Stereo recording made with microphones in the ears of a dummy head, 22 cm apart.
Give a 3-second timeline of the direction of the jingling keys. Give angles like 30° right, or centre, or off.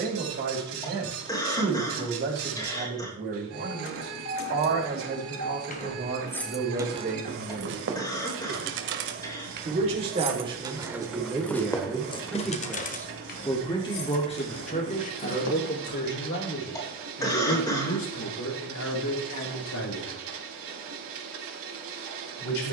off, 50° left, 40° right, 20° right, 40° left, 60° left, off, off.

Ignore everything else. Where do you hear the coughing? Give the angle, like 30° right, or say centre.
20° left.